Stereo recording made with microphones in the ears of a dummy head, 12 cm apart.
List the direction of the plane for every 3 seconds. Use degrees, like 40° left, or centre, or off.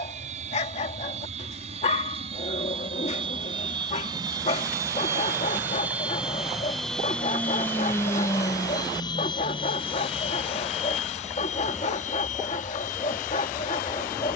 50° right, 30° right, 10° left, 40° left, 60° left.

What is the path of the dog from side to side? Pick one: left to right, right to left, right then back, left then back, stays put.
stays put.